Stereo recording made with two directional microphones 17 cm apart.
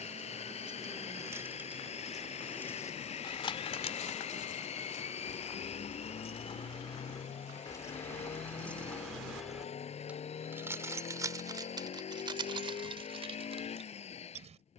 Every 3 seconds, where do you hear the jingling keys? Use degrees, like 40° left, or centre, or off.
10° right, 40° left, 20° left, 10° right, 30° right.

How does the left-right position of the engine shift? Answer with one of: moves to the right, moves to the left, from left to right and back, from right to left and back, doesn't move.
doesn't move.